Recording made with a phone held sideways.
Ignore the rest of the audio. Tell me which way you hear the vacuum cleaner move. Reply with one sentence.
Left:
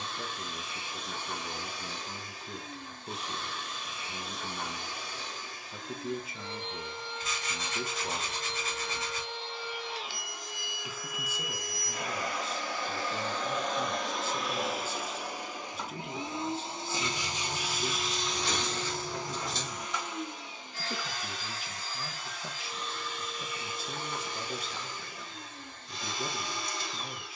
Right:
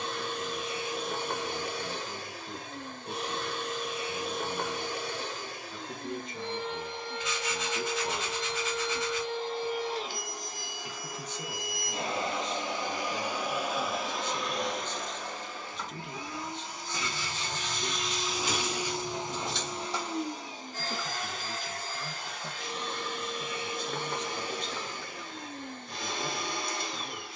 You can hear the vacuum cleaner move from right to left and back again.